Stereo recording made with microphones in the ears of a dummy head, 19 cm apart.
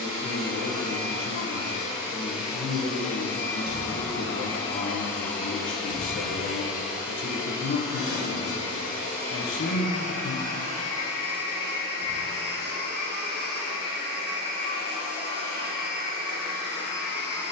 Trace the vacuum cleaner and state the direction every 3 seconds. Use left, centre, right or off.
right, centre, centre, right, right, right.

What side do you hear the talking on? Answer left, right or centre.
left.